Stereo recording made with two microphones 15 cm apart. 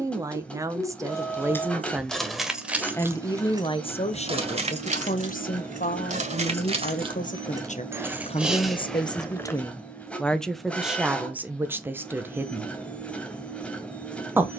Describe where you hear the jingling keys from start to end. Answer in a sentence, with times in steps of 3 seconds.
In this clip you hear the jingling keys in the centre from 0 s, on the right from 3 s, in the centre from 9 s and not at all from 12 s.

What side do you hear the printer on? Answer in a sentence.
You can hear the printer in the centre.